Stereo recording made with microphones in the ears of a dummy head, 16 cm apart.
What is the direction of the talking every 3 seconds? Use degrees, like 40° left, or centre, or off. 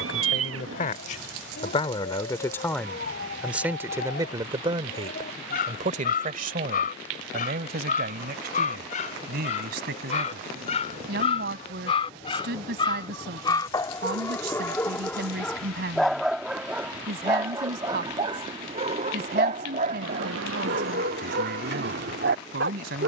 30° left, 20° right, 50° right, 60° right, 60° right, 60° right, 60° right, 60° right.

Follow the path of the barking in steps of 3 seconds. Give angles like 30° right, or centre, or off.
50° left, 50° left, 50° left, 40° left, 20° left, 10° right, 40° right, 60° right.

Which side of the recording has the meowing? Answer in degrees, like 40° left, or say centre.
80° right.